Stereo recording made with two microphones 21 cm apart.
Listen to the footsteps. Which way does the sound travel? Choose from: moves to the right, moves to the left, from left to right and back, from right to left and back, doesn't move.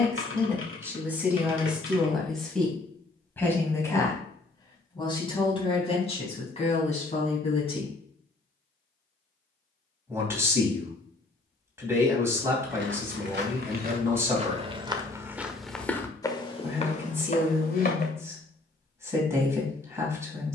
moves to the left.